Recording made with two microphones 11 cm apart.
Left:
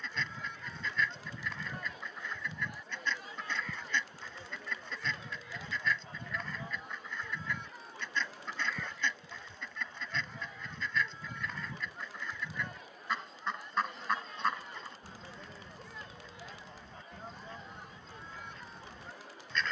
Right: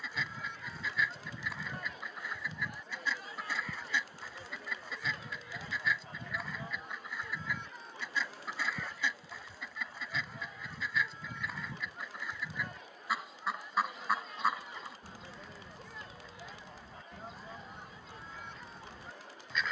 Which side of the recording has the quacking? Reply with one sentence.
You can hear the quacking in the centre.